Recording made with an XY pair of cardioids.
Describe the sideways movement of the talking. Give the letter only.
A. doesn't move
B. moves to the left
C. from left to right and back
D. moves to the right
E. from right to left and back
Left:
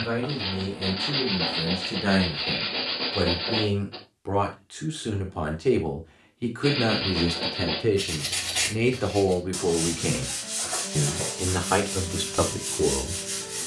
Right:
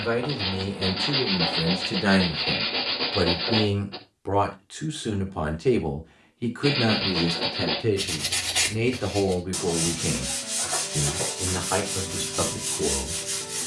B.